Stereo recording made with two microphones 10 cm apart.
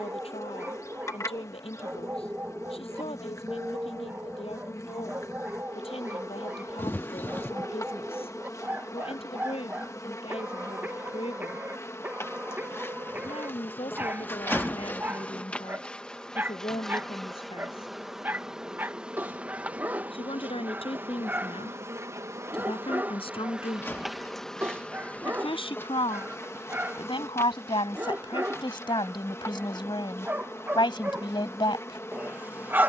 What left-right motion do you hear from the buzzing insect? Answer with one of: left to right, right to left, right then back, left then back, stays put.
right then back.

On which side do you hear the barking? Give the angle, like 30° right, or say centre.
20° right.